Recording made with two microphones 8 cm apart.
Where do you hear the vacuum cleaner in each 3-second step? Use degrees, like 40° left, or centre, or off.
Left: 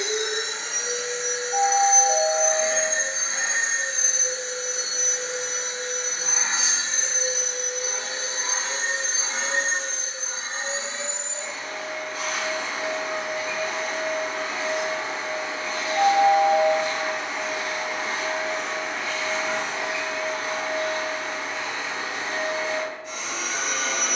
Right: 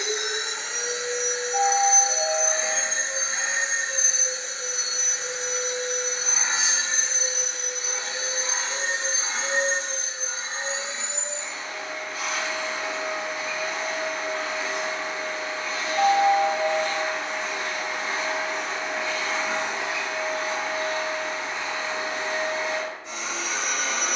40° left, 40° left, 40° left, 40° left, 40° left, 20° left, 10° right, 20° right.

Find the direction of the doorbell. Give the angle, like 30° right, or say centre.
60° left.